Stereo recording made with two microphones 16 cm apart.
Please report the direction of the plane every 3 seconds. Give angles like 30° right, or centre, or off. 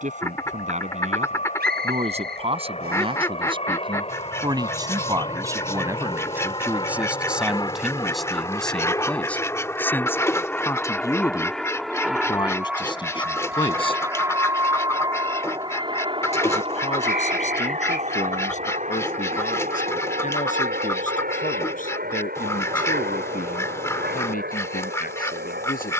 50° left, 40° left, 30° left, 10° left, 10° right, 30° right, 50° right, 60° right, 70° right.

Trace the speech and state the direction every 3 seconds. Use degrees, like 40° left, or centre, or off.
40° right, 20° right, centre, 10° left, 30° left, 40° left, 50° left, 50° left, 60° left.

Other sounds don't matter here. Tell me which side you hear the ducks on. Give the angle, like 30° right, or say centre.
20° left.